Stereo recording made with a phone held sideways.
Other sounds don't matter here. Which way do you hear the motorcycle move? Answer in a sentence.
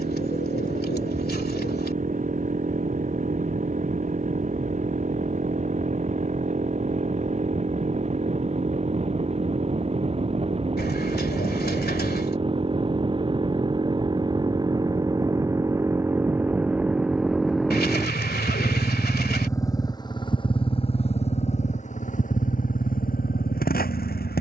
In this clip you hear the motorcycle travel towards the left.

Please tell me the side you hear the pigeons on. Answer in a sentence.
In this clip you hear the pigeons on the left.